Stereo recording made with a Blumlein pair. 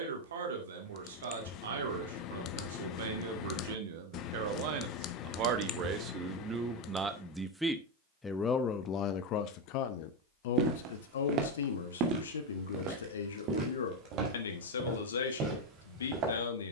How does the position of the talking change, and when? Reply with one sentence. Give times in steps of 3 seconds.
In this clip you hear the talking on the right from 0 s, in the centre from 6 s and on the left from 9 s.